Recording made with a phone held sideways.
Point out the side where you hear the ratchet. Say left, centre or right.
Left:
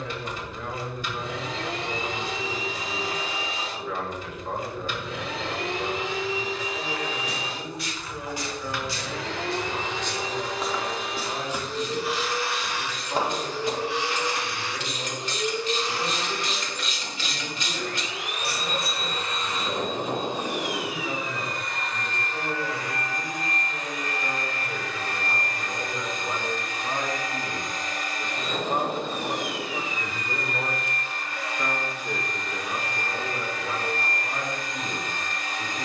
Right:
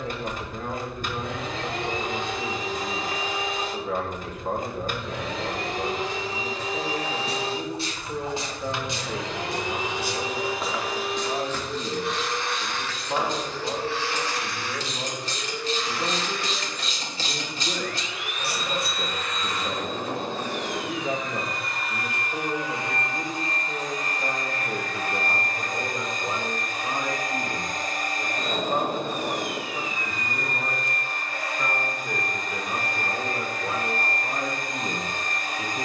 right.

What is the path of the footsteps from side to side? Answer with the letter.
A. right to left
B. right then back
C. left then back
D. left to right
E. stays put
A.